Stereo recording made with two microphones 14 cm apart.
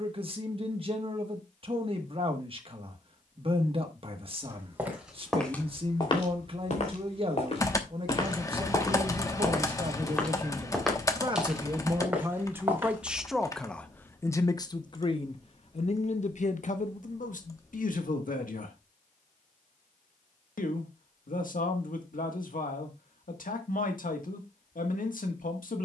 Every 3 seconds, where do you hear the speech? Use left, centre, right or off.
right, right, right, right, centre, left, left, left, left.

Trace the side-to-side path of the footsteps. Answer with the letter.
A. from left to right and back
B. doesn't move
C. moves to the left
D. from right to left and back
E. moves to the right
D.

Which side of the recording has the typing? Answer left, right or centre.
left.